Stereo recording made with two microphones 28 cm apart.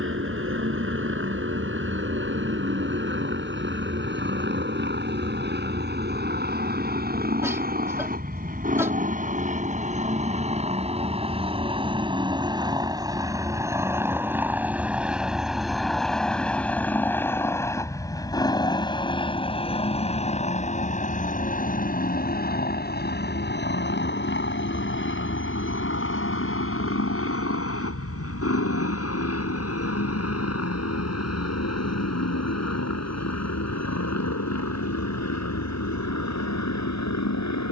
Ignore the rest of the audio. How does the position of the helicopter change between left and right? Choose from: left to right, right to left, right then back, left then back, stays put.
right to left.